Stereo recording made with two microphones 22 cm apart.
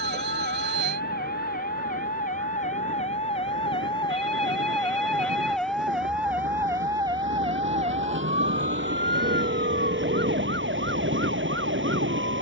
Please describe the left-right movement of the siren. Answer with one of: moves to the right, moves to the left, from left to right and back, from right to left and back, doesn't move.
moves to the right.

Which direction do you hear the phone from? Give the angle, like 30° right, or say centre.
50° right.